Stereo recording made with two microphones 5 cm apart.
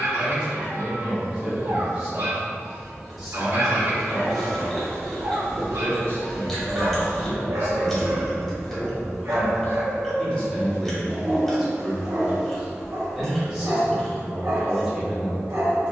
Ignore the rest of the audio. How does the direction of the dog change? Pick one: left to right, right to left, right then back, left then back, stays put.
stays put.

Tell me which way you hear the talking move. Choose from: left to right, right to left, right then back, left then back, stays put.
left then back.